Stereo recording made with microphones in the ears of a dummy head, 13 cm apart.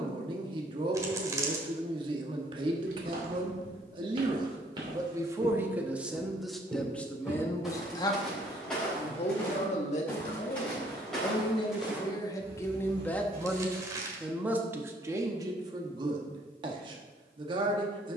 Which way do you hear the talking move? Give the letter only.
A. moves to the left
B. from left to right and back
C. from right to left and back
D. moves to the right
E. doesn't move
C.